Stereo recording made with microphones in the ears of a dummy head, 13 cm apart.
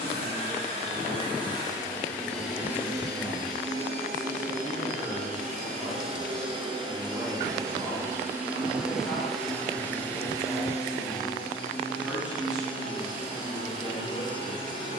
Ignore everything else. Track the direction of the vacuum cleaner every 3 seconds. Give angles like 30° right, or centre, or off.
20° left, 50° right, 20° right, 20° left, 40° left.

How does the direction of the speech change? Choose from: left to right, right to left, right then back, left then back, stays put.
stays put.